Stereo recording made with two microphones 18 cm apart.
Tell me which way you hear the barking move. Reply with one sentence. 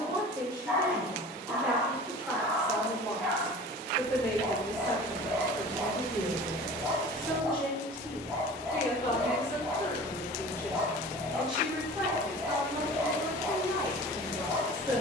You can hear the barking stay in one place.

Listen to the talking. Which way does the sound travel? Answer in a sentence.
You can hear the talking go left and come back.